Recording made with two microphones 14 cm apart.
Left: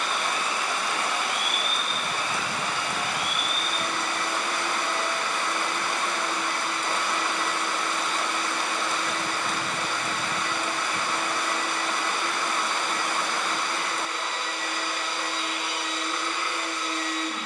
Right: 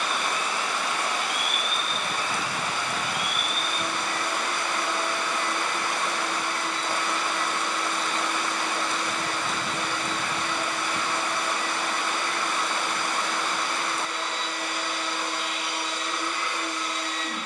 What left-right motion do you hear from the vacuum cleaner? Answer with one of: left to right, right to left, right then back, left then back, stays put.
stays put.